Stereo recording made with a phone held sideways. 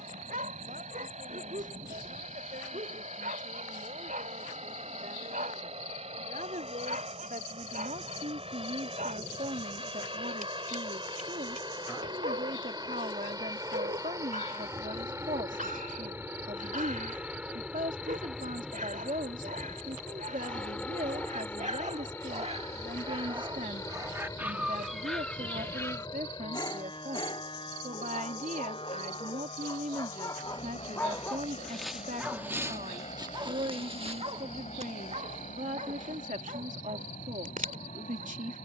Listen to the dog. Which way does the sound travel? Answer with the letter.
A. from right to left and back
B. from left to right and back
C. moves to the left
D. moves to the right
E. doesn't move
A.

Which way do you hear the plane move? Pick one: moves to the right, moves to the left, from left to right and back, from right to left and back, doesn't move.
moves to the left.